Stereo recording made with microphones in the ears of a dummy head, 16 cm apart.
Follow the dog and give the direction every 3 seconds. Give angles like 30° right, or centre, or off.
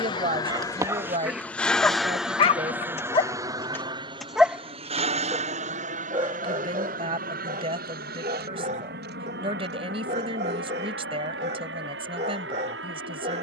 centre, 10° left, 40° right, 40° right, 40° right.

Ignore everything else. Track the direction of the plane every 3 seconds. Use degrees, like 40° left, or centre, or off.
10° left, 30° right, 50° right, 60° right, 60° right.